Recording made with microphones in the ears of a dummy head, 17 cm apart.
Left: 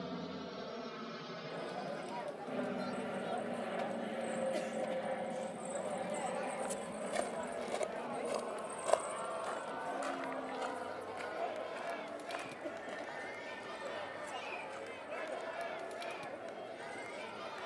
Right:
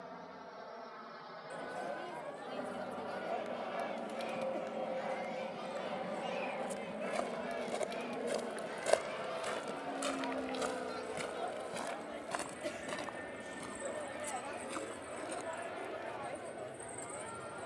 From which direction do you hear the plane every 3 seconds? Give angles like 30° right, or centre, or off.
40° left, 10° left, 10° right, 30° right, 40° right, 50° right.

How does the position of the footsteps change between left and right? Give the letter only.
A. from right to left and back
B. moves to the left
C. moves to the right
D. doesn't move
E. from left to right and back
C.